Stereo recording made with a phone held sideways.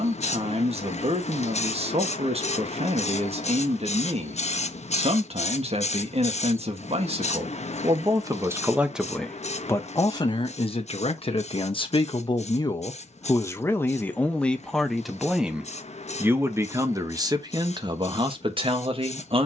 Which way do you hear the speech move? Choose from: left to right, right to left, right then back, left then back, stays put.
left then back.